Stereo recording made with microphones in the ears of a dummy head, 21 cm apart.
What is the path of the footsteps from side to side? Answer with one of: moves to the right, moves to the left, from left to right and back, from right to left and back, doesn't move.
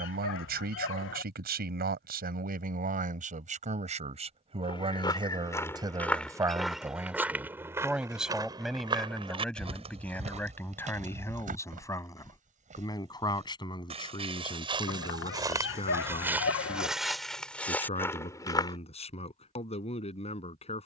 from left to right and back.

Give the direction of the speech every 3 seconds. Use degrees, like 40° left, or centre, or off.
40° right, 30° right, 10° right, 10° left, 20° left, 30° left, 30° left.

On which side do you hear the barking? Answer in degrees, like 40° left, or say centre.
60° left.